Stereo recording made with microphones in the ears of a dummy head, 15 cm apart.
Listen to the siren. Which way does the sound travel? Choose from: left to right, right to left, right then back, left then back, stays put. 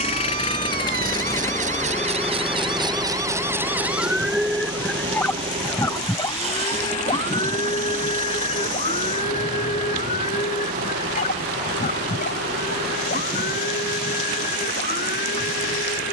right to left.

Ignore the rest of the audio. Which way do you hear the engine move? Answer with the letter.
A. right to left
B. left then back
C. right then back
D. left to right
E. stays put
D.